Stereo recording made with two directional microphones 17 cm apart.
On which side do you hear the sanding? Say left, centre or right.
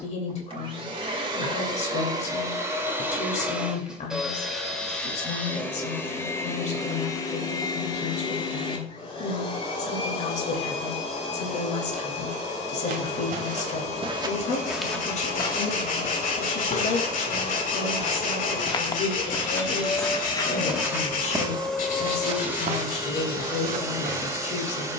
left.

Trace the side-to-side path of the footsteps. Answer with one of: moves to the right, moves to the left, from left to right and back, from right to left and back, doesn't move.
from right to left and back.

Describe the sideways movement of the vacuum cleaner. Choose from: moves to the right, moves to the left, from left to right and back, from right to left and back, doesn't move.
from right to left and back.